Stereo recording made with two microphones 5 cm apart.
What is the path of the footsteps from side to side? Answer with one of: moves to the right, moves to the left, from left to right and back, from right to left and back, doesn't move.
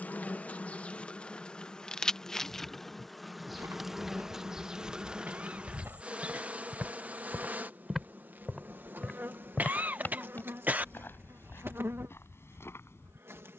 moves to the left.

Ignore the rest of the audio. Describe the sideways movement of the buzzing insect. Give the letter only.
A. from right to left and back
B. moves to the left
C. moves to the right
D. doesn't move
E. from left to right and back
C.